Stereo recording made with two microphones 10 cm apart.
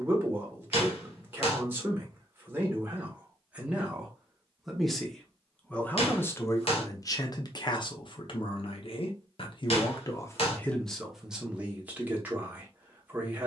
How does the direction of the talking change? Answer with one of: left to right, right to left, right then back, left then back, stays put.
left then back.